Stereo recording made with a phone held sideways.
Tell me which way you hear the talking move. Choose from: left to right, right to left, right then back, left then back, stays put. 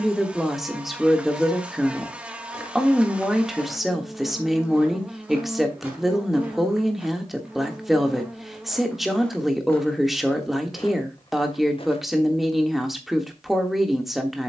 stays put.